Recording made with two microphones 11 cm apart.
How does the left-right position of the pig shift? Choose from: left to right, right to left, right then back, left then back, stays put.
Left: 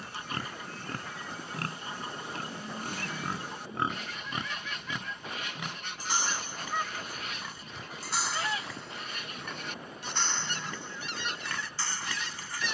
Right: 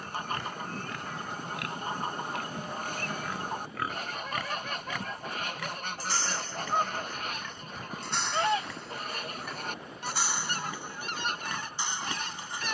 left to right.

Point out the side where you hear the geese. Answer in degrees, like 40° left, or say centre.
50° right.